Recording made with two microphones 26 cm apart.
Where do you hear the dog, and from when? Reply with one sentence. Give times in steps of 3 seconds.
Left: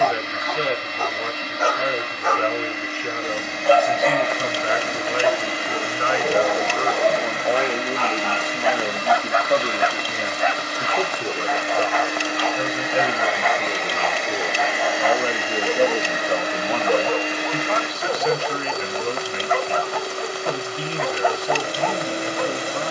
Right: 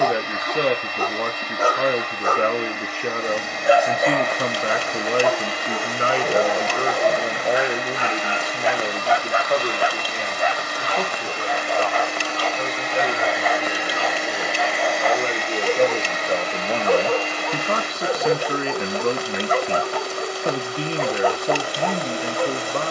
You can hear the dog on the right from 0 s, in the centre from 3 s and on the right from 9 s.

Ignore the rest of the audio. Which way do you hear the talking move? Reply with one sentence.
You can hear the talking go left and come back.